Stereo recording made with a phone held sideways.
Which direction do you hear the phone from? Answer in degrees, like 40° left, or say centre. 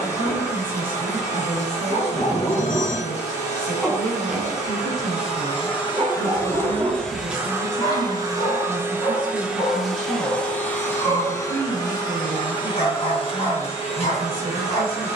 70° left.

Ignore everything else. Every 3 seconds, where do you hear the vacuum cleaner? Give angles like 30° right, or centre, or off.
50° left, 50° left, 10° right, 10° left, 40° left.